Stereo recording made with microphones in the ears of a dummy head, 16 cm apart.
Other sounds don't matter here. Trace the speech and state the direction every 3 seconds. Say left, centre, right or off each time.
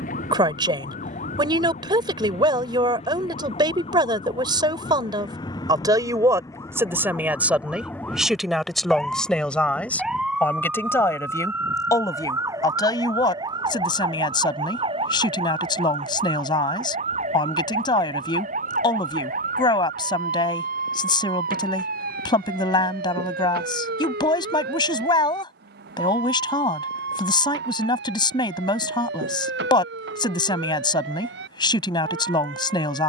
right, right, centre, centre, left, left, left, left, left, left, left.